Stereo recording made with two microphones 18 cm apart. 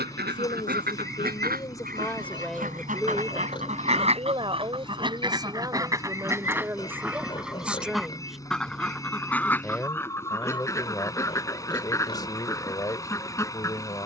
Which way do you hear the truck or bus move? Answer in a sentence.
In this clip you hear the truck or bus stay put.